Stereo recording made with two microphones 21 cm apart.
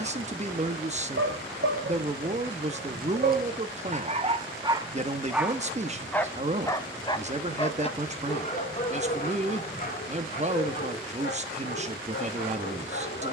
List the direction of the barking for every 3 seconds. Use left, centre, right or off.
right, right, left, left, left.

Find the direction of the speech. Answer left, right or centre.
right.